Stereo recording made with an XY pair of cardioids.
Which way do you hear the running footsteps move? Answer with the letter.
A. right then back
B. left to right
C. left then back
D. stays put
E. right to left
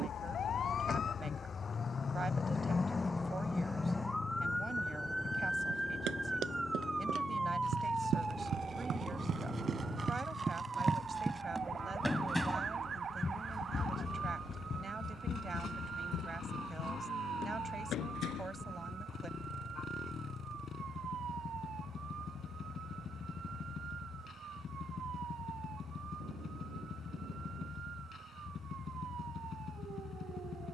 E.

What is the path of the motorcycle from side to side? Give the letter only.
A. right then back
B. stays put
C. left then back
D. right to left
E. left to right
B.